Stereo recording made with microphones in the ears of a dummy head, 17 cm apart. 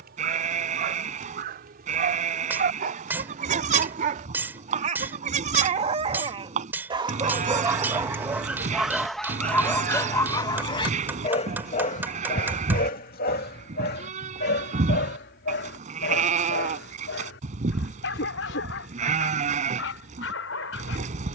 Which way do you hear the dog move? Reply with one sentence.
In this clip you hear the dog move to the left.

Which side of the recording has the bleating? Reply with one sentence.
In this clip you hear the bleating on the right.